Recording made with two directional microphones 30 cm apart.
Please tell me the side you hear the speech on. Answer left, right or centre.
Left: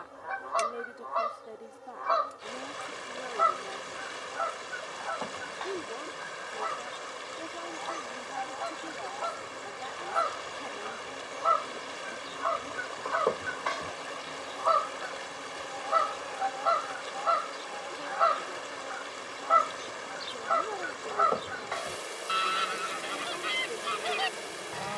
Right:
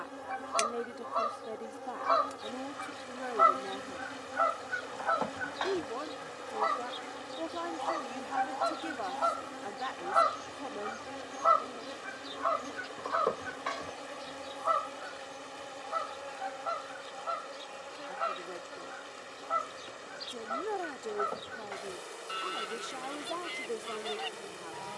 right.